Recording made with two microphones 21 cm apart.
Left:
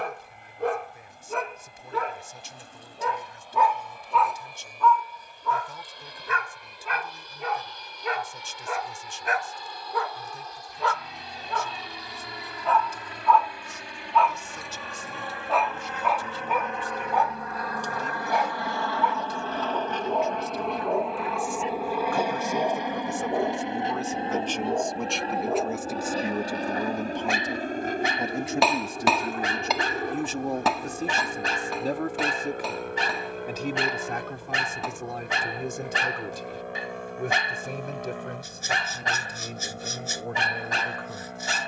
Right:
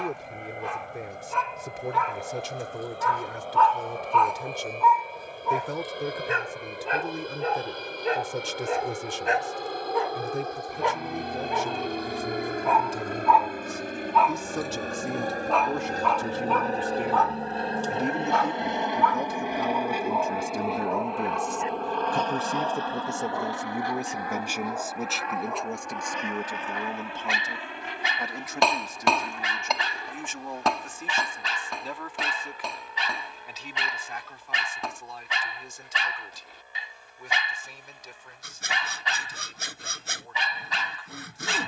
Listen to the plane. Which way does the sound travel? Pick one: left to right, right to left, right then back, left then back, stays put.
right to left.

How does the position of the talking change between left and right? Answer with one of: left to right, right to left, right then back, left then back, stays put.
right to left.